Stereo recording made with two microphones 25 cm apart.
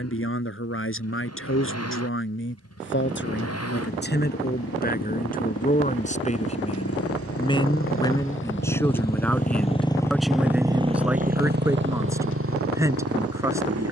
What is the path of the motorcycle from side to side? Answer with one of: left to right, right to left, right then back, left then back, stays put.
left to right.